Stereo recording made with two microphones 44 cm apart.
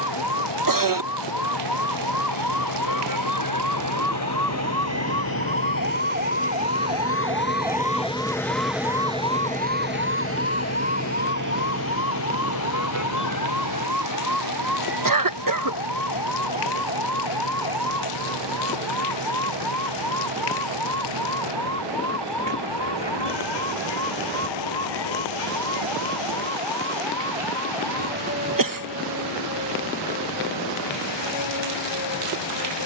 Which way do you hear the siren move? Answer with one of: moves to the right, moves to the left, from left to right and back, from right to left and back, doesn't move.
moves to the left.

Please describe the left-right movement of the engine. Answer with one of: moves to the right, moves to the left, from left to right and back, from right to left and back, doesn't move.
moves to the right.